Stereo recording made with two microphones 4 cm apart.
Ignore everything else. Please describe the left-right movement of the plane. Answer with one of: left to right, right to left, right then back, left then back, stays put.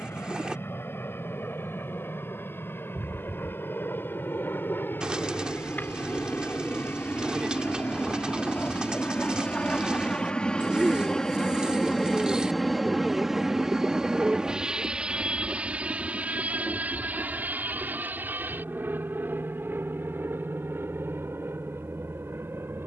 left to right.